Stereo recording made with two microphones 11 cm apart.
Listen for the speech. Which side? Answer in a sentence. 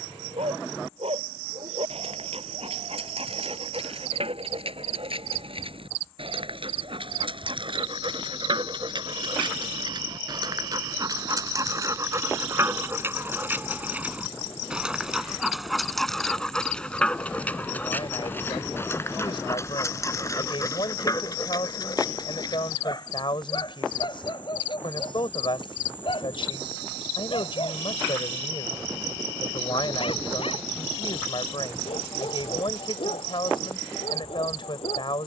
You can hear the speech on the left.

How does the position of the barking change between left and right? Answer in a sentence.
In this clip you hear the barking travel towards the left.